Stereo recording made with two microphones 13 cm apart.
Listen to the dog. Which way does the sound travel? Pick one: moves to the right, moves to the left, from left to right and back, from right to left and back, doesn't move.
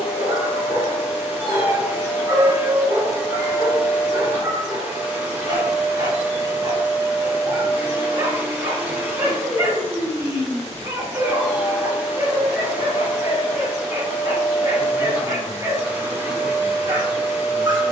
doesn't move.